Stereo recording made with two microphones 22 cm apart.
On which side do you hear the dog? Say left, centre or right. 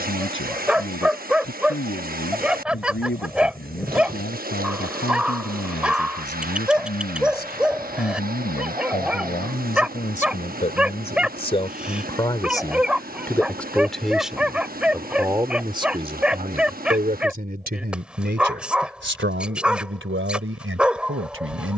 centre.